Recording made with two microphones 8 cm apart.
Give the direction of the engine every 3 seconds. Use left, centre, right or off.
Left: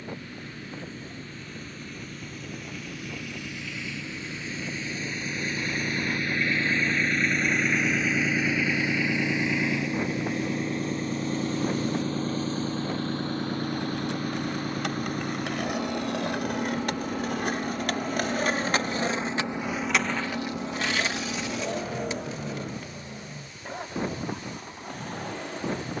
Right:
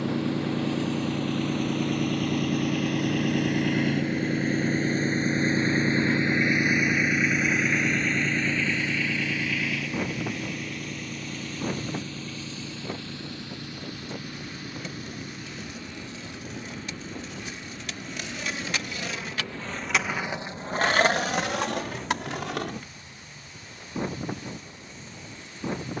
right, right, centre, left, left, left, left, left, left.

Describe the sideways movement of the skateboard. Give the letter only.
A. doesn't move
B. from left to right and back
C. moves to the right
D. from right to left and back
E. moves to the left
C.